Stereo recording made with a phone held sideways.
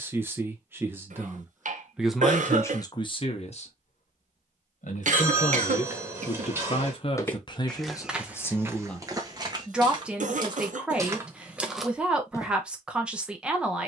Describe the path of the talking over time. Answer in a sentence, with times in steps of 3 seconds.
In this clip you hear the talking in the centre from 0 s, on the left from 3 s and in the centre from 9 s.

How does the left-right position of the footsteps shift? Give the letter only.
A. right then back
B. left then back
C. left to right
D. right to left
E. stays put
A.